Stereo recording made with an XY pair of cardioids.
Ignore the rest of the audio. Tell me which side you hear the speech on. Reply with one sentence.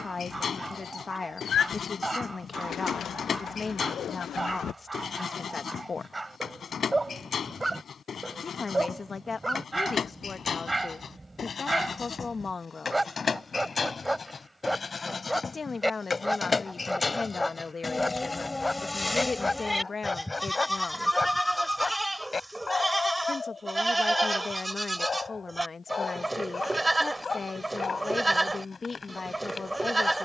In this clip you hear the speech on the left.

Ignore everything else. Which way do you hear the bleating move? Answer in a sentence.
You can hear the bleating move from left to right.